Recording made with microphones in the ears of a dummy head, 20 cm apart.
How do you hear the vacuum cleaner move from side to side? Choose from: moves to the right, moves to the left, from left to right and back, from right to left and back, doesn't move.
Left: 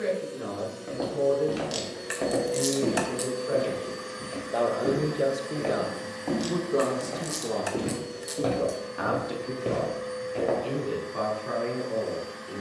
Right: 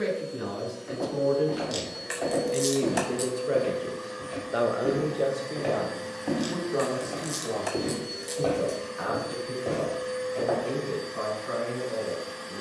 moves to the right.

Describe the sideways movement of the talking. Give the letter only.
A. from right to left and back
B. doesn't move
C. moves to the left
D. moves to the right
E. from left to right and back
C.